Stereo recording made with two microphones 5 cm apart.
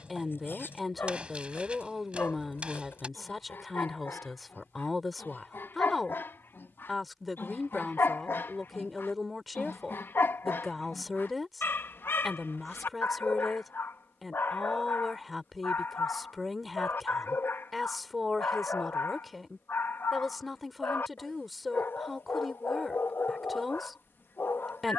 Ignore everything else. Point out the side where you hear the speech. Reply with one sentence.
You can hear the speech in the centre.